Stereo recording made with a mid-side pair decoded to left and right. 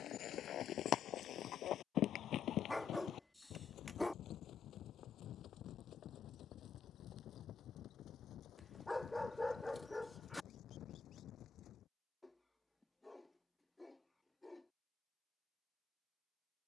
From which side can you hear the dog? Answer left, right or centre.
centre.